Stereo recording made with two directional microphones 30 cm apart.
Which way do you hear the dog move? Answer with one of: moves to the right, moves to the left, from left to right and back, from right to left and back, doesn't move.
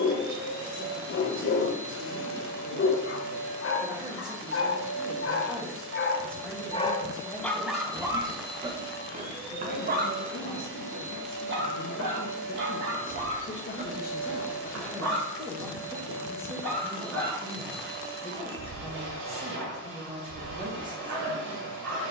moves to the right.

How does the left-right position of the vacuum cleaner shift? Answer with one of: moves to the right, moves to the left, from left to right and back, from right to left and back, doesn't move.
doesn't move.